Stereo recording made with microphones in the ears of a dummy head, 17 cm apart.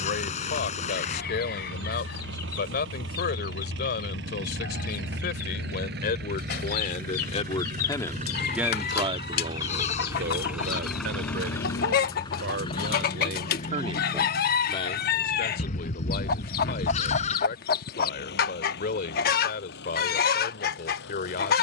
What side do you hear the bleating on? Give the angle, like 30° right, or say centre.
40° left.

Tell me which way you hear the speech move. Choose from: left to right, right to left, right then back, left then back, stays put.
right then back.